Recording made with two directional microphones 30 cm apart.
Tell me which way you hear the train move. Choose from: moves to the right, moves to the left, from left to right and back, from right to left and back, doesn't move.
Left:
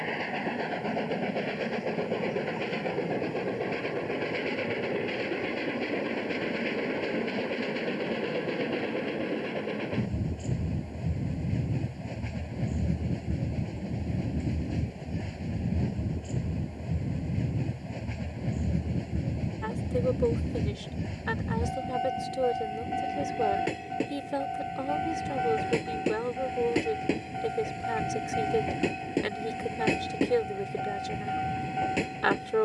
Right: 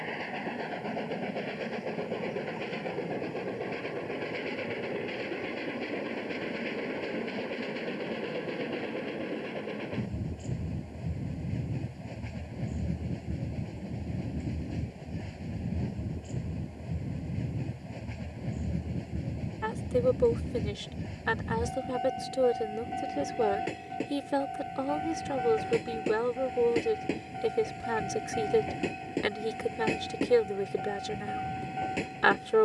doesn't move.